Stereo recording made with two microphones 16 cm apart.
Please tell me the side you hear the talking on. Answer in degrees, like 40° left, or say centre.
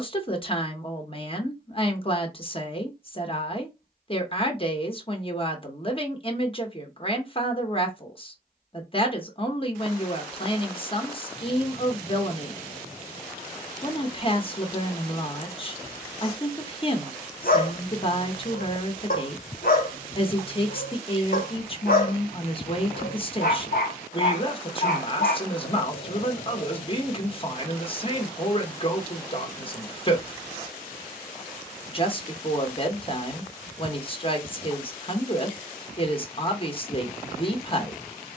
30° left.